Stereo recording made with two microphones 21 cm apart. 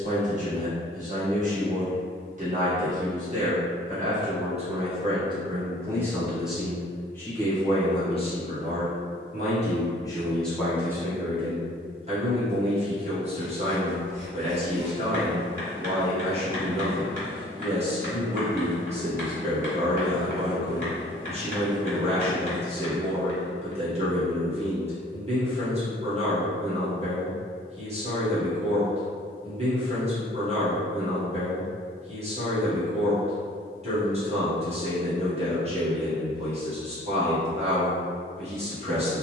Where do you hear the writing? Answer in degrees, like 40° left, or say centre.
40° right.